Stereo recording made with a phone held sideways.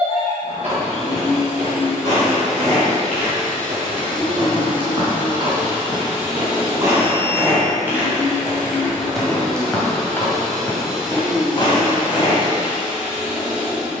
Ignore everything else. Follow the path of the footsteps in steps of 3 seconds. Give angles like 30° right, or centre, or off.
50° right, 40° right, 20° right, 20° left, 50° left.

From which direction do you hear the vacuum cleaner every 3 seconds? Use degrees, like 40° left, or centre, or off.
50° left, 40° left, 20° left, centre, 10° right.